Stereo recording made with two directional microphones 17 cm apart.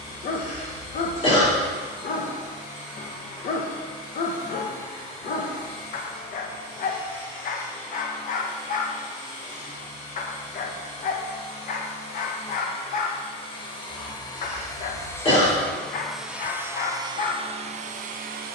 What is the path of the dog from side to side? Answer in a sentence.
In this clip you hear the dog stay in one place.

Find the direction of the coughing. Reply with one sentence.
You can hear the coughing on the left.